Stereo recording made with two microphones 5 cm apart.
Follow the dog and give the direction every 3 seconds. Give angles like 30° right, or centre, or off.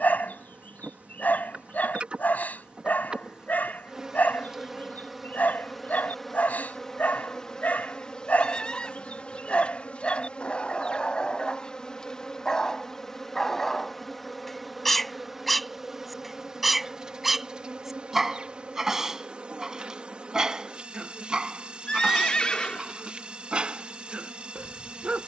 40° left, 40° left, 40° left, 20° left, 10° left, centre, 10° right, 20° right, 20° right.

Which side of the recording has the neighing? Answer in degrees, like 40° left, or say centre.
20° left.